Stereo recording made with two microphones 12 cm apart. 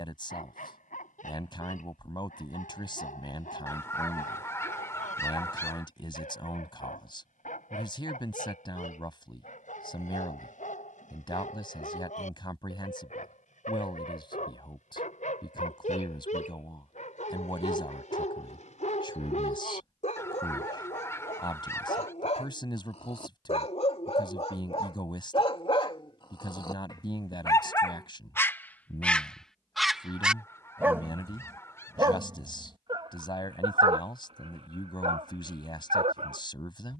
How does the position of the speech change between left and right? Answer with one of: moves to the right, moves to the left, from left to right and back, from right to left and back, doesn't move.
doesn't move.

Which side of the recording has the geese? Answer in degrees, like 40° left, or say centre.
20° left.